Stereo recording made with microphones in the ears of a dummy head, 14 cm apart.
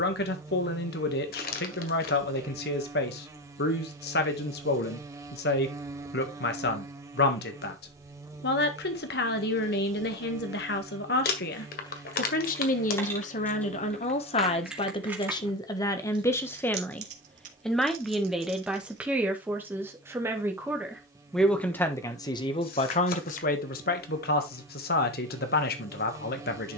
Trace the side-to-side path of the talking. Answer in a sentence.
In this clip you hear the talking go right and come back.